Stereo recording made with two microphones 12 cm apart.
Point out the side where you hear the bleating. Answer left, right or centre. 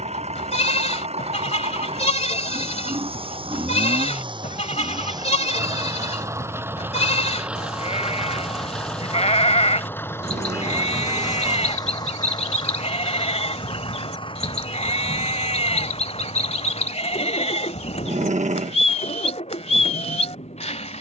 left.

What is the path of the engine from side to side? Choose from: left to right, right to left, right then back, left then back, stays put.
right to left.